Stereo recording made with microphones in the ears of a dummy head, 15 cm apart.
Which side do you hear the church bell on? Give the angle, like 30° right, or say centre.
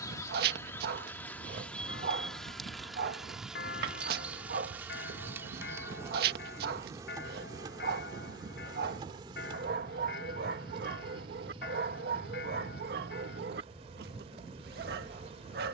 70° left.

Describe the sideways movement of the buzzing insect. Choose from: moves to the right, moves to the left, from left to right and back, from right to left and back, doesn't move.
moves to the right.